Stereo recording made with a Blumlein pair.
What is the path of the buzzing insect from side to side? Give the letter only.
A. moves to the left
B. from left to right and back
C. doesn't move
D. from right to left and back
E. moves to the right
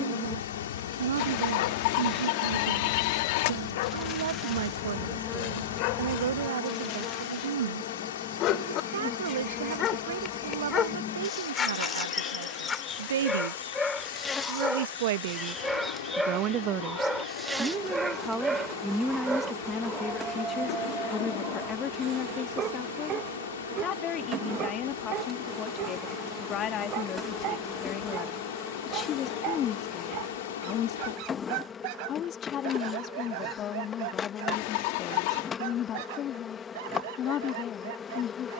B.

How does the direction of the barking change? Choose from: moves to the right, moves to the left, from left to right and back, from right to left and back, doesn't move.
moves to the right.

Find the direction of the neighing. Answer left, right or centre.
left.